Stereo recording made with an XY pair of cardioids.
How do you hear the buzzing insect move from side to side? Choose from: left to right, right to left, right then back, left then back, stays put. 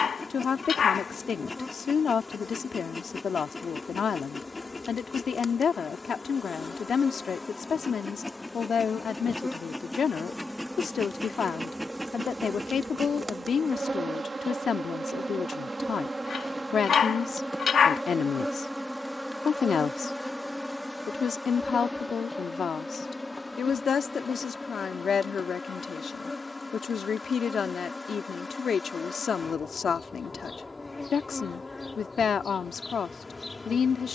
right then back.